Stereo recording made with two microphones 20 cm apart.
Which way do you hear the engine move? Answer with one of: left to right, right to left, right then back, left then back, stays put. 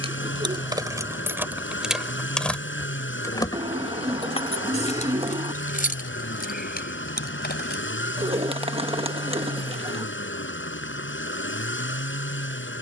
stays put.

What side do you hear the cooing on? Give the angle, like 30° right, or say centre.
30° right.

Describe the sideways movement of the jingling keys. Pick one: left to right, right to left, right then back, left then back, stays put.
right to left.